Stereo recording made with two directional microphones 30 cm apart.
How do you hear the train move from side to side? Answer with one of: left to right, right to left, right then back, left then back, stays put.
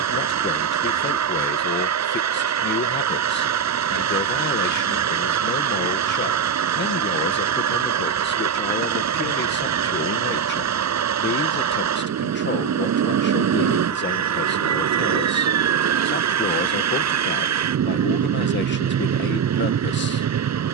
stays put.